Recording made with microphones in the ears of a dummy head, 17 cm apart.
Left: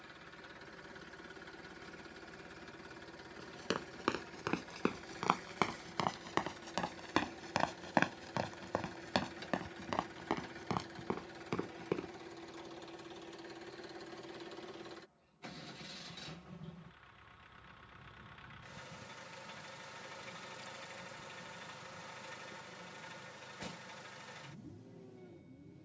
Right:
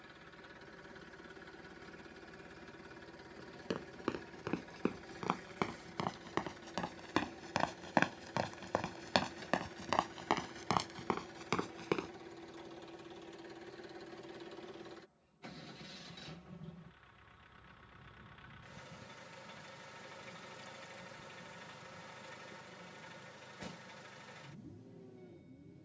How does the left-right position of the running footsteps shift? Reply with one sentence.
You can hear the running footsteps move from left to right.